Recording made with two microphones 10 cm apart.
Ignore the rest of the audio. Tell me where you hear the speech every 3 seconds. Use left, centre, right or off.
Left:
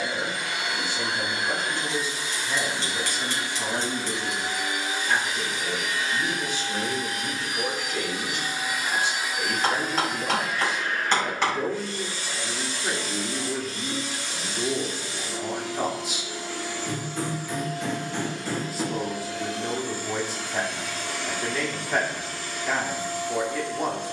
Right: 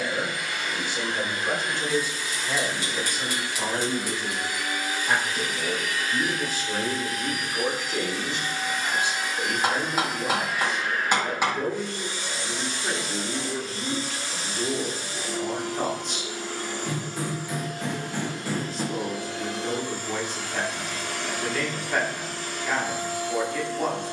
right, right, right, centre, centre, centre, centre, centre.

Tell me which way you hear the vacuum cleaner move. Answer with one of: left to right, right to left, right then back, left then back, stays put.
left to right.